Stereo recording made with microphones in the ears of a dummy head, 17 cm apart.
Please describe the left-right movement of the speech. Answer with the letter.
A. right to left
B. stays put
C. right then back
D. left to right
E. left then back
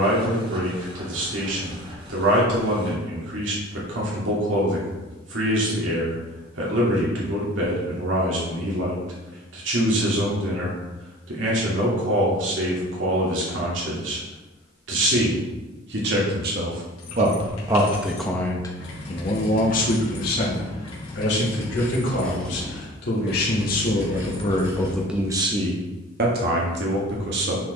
E.